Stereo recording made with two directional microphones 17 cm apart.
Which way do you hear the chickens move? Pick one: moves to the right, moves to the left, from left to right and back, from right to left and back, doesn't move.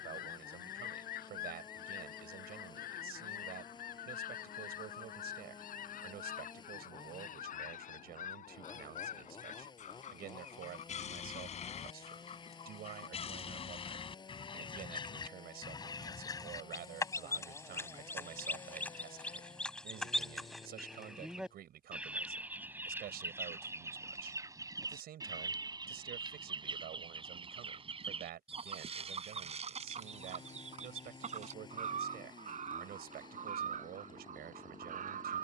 moves to the right.